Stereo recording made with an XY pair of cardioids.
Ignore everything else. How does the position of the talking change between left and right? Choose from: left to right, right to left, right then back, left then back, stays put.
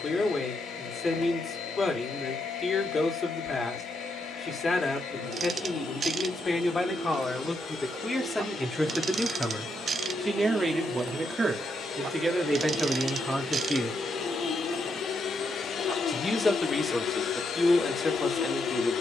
right then back.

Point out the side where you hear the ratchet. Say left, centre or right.
right.